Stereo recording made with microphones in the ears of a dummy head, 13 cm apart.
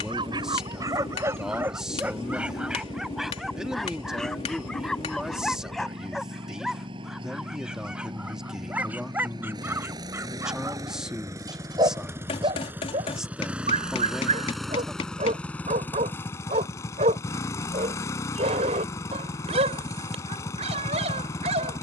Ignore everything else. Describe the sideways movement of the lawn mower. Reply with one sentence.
You can hear the lawn mower go from the right side to the left.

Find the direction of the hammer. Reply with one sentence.
In this clip you hear the hammer on the left.